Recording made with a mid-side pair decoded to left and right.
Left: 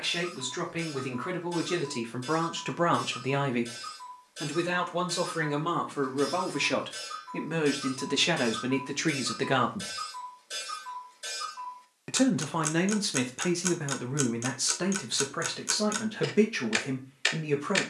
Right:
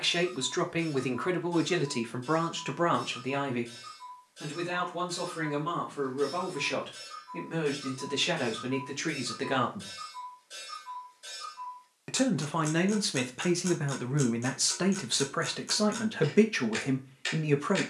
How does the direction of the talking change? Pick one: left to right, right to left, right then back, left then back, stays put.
left then back.